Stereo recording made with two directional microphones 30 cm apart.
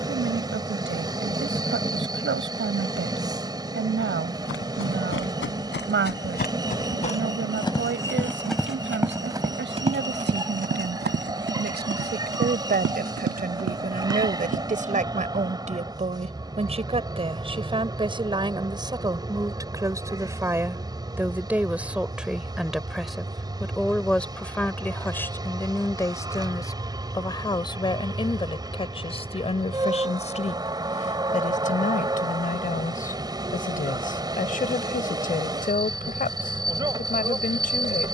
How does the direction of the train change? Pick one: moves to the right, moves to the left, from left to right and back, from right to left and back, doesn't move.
doesn't move.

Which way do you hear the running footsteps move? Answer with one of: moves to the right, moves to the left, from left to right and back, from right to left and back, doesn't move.
moves to the right.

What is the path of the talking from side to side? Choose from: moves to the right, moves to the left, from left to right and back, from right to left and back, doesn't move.
moves to the left.